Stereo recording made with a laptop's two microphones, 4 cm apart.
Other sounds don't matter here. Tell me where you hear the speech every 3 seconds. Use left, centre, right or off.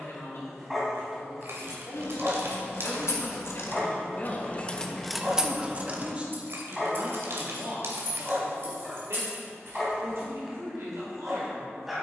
left, left, right, right.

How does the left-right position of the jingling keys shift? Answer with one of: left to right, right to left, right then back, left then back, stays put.
left to right.